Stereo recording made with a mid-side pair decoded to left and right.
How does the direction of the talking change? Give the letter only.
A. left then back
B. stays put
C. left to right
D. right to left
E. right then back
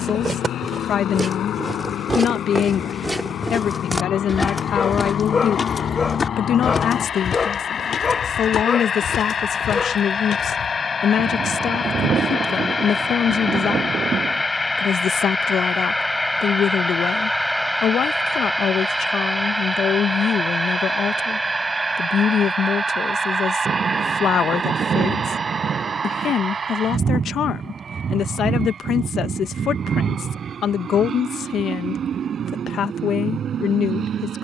B.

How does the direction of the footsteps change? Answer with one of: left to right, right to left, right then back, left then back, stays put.
right to left.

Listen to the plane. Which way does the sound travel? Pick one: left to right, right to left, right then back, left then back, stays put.
left to right.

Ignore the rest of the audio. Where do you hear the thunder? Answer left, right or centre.
right.